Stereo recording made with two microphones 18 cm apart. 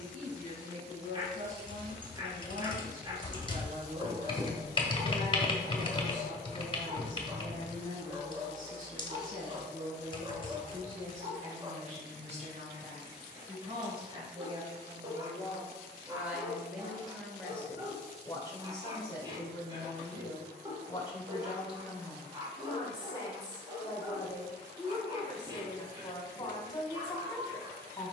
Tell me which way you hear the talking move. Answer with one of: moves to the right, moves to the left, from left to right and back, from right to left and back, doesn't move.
moves to the left.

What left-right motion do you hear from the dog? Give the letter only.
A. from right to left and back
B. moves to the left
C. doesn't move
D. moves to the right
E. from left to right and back
C.